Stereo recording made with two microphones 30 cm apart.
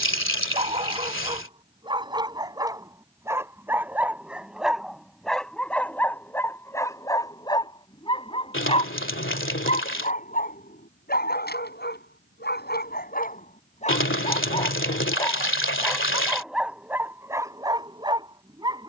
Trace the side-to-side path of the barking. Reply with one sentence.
In this clip you hear the barking move from right to left and back again.